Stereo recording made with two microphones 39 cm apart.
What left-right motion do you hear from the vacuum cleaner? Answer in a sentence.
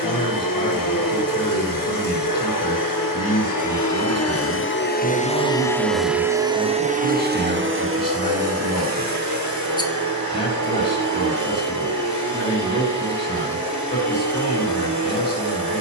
You can hear the vacuum cleaner go from the left side to the right.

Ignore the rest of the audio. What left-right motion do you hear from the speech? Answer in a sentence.
You can hear the speech stay put.